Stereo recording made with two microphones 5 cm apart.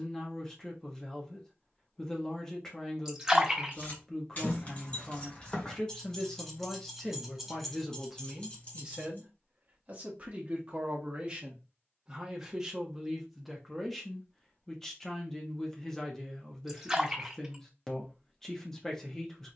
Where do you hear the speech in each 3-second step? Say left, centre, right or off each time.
centre, centre, centre, right, centre, centre, centre.